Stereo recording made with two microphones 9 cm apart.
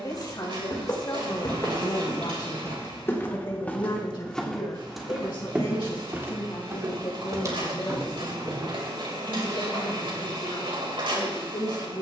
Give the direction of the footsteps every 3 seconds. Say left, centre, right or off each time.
left, centre, right, off.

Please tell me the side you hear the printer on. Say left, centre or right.
right.